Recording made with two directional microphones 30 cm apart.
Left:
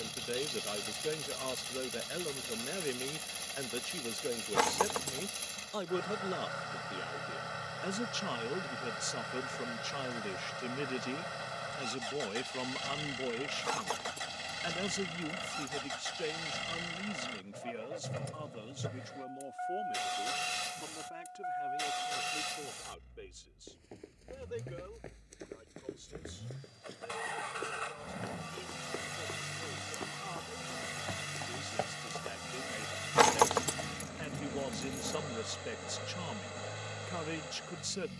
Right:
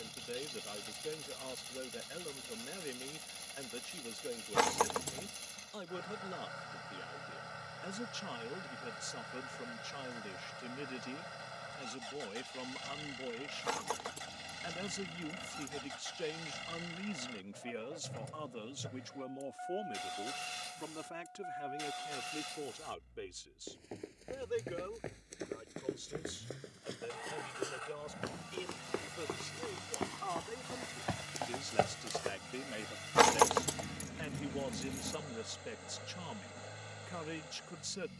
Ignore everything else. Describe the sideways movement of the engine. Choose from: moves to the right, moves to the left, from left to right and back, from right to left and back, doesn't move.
doesn't move.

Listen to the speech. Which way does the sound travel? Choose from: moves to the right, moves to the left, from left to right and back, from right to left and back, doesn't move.
from left to right and back.